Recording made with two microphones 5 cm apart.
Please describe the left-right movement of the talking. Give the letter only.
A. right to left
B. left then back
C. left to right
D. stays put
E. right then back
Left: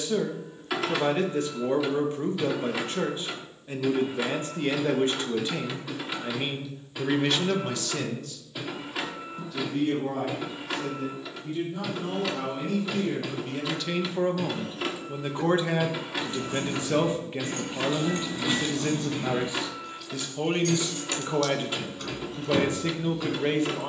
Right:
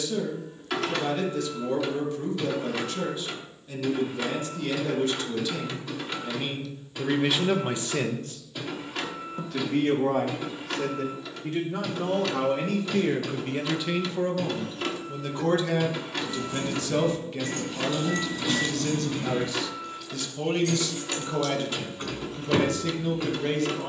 E.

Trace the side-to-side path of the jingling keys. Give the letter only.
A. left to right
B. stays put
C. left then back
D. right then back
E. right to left
A.